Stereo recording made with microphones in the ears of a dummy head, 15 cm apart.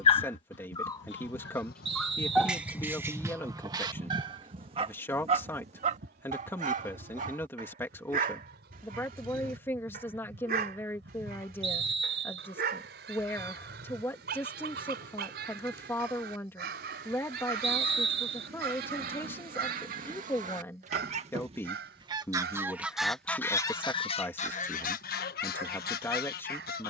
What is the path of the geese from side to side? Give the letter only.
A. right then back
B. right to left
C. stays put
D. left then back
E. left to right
A.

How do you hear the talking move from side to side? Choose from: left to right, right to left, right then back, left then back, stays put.
stays put.